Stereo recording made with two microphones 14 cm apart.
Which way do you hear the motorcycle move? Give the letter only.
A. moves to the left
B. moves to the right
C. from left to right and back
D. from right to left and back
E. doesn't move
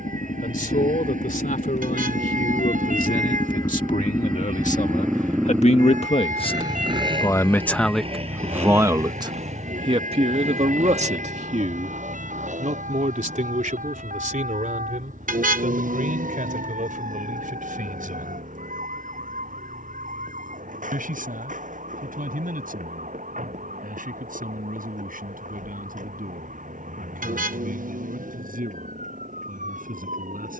B.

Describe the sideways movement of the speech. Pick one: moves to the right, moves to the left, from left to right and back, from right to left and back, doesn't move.
moves to the right.